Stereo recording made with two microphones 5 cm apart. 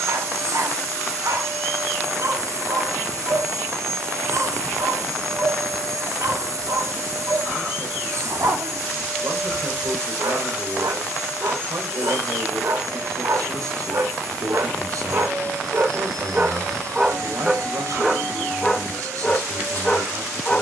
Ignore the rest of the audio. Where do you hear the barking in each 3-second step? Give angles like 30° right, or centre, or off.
60° right, 60° right, 60° right, 60° right, 60° right, 30° right, 10° left.